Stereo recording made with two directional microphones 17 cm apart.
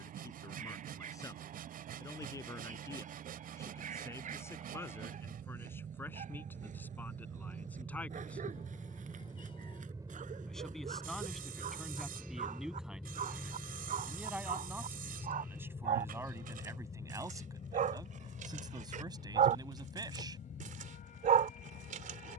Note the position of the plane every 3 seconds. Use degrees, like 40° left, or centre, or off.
60° right, 50° right, 40° right, 20° right, 10° left, 30° left, 40° left, 50° left.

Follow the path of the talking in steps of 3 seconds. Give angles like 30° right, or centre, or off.
20° left, 10° left, 10° left, centre, 10° right, 20° right, 20° right, off.